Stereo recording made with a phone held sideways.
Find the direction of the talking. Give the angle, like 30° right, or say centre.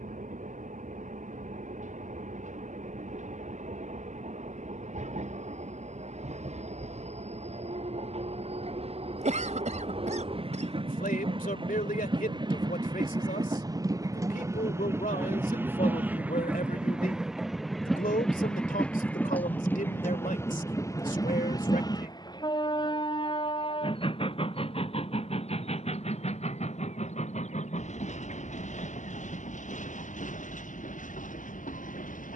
70° left.